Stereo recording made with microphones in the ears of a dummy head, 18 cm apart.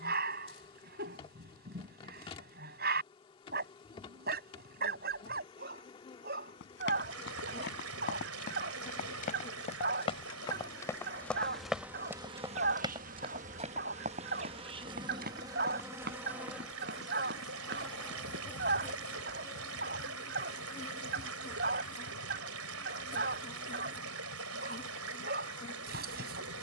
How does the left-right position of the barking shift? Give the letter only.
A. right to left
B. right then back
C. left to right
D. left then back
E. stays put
E.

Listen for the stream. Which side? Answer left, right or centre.
right.